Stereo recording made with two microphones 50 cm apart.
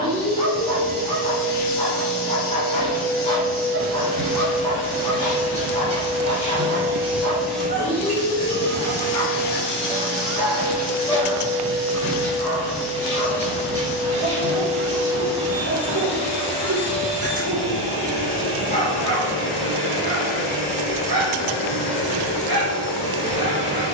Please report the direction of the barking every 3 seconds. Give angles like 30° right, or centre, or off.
20° left, 20° left, 20° left, 10° left, 20° right, 40° right, 40° right, 40° right.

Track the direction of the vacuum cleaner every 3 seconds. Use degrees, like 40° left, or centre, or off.
20° right, 20° right, centre, 30° left, 30° left, 30° left, 30° left, 30° left.